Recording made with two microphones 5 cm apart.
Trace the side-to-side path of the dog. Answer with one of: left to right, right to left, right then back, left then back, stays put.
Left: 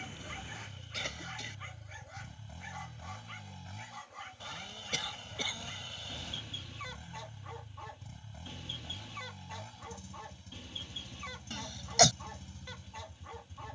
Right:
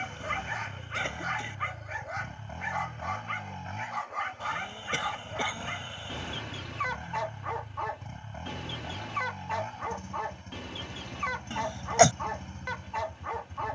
stays put.